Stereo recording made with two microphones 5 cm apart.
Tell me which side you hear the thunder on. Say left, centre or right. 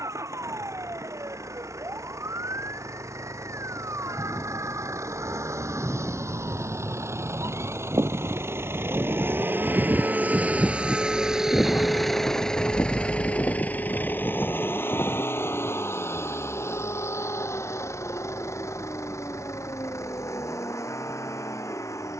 left.